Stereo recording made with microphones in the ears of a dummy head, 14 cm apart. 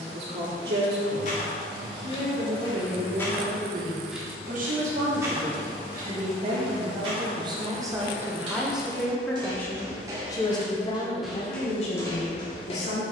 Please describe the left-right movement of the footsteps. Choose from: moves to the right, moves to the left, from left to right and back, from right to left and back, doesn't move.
from left to right and back.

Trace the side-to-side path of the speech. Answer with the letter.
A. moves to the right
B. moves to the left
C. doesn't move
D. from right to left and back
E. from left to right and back
B.